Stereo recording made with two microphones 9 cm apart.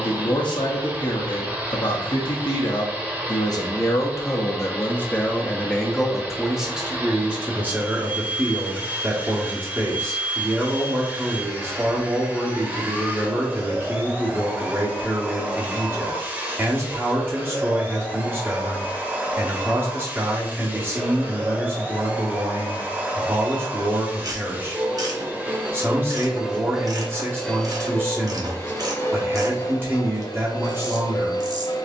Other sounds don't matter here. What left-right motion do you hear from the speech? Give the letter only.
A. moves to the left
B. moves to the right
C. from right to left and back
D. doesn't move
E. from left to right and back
B.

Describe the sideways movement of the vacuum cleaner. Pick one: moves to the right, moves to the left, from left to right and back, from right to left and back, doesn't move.
moves to the left.